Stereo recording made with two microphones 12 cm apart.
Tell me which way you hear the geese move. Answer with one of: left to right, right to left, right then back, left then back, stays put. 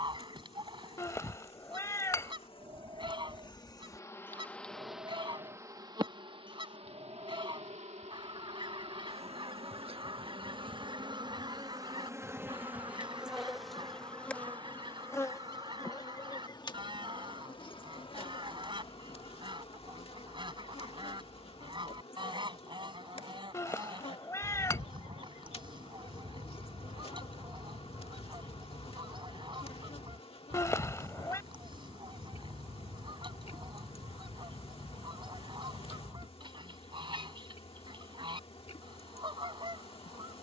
stays put.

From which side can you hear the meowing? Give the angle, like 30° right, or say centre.
20° left.